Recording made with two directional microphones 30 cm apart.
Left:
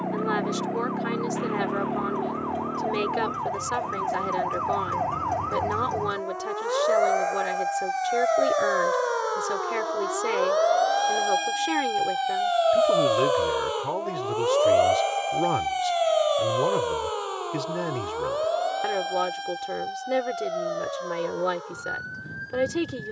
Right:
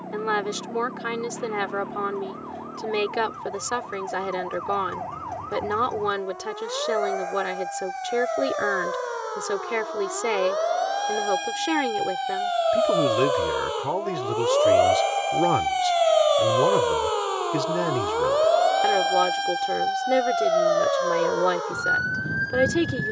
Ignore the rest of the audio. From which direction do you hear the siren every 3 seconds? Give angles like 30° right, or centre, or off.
60° left, 50° left, 40° left, 30° left, 10° left, 20° right, 50° right, 60° right.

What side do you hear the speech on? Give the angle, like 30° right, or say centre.
20° right.